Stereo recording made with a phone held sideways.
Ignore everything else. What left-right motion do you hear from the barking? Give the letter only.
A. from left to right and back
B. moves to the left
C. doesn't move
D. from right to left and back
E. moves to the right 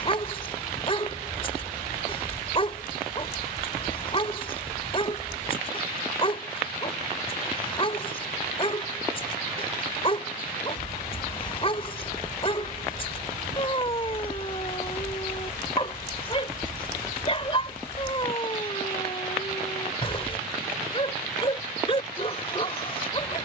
C.